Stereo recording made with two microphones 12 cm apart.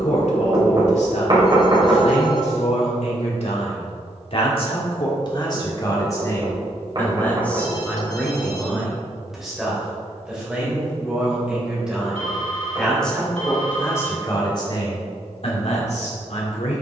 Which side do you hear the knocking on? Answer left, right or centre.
right.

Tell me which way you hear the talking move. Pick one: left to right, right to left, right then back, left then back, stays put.
right then back.